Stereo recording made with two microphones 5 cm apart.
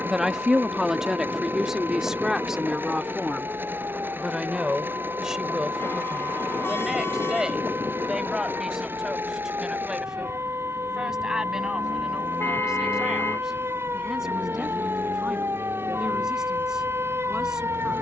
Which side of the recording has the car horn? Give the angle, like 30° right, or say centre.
60° left.